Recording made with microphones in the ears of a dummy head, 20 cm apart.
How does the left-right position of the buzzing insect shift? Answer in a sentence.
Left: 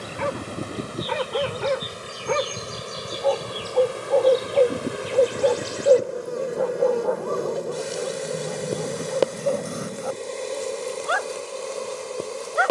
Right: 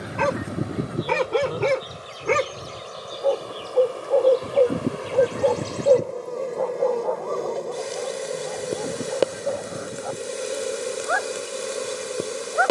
You can hear the buzzing insect travel towards the right.